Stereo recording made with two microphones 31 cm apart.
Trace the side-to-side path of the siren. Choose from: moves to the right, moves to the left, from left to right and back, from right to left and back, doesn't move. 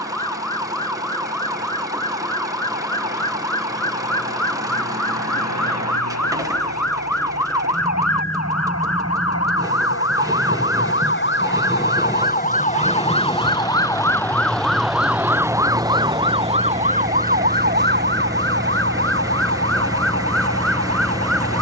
moves to the right.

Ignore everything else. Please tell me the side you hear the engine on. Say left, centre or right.
centre.